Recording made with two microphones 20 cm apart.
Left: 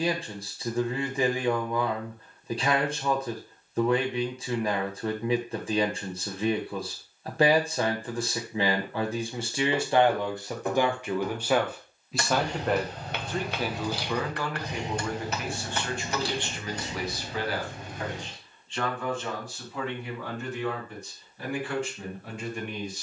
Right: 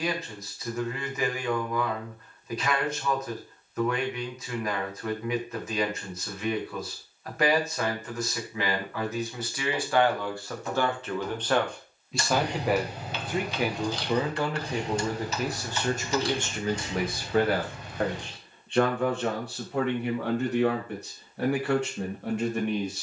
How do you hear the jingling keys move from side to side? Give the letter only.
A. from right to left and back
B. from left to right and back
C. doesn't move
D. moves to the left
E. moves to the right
D.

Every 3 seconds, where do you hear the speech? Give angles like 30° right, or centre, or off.
30° left, 30° left, 30° left, 20° left, 20° right, 50° right, 60° right, 70° right.